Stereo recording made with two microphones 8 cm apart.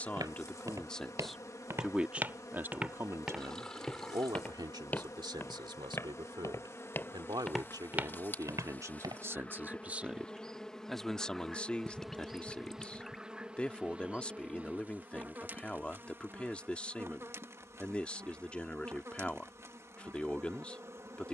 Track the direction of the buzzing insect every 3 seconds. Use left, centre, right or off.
left, left, left, centre, centre, right, right.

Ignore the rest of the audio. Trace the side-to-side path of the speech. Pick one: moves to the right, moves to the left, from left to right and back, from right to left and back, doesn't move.
from left to right and back.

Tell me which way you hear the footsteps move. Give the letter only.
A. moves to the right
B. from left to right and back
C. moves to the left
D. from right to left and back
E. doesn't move
D.